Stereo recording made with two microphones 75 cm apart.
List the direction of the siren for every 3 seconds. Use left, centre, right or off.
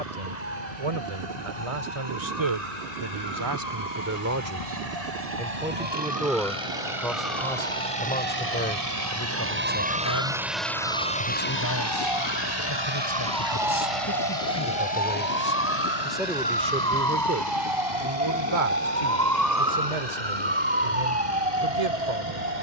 left, left, left, left, left, centre, right, right.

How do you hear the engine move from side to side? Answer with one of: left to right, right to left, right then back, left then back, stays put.
right to left.